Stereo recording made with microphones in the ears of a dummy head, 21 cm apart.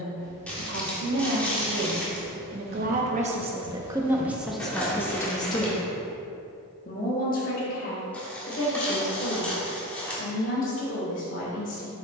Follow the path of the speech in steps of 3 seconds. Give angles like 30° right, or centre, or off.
60° right, centre, 40° left, 50° left.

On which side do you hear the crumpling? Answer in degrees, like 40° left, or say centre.
10° left.